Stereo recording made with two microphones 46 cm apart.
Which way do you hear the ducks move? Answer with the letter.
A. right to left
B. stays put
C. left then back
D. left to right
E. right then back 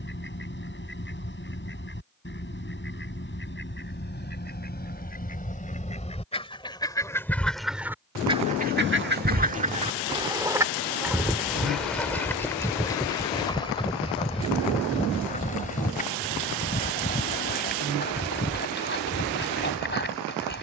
E.